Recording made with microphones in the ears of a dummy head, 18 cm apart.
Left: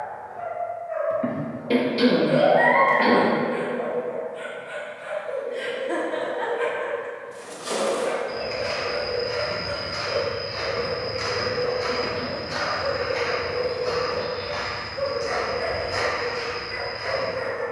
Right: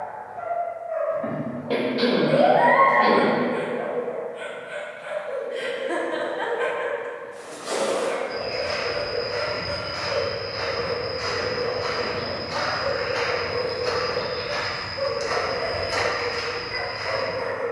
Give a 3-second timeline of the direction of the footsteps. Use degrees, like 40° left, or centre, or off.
off, off, 70° left, 50° left, 20° right, 60° right.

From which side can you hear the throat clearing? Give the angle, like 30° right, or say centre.
30° left.